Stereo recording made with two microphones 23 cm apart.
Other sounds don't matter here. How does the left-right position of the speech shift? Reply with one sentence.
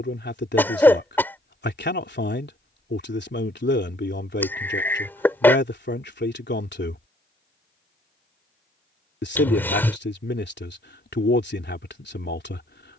In this clip you hear the speech stay in one place.